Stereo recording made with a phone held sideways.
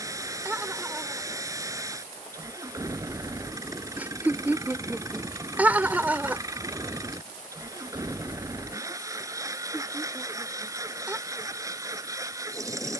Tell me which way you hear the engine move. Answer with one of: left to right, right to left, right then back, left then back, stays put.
stays put.